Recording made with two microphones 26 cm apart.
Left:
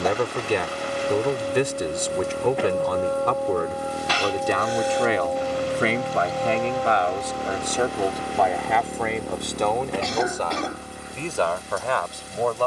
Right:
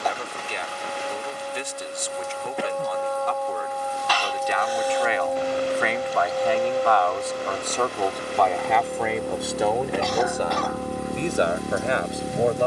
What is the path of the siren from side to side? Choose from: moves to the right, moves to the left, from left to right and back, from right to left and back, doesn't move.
moves to the right.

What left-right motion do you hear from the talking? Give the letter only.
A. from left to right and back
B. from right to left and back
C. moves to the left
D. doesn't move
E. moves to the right
E.